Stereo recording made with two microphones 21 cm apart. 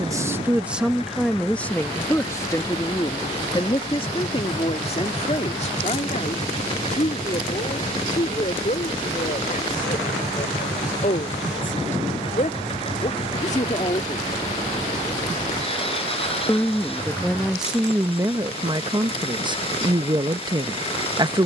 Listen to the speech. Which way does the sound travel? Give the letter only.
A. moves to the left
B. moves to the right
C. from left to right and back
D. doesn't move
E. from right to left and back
E.